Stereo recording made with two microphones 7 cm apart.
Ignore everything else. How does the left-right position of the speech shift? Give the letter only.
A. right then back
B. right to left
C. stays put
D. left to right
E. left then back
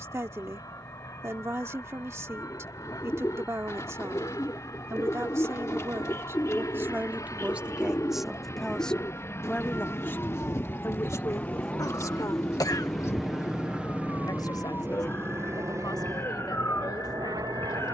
B.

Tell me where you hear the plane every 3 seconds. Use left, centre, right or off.
left, left, left, left, centre, right.